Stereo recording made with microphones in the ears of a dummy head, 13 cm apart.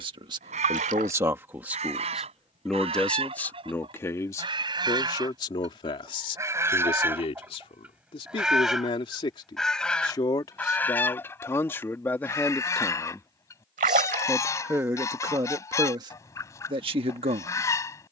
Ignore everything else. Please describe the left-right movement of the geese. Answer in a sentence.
In this clip you hear the geese travel towards the left.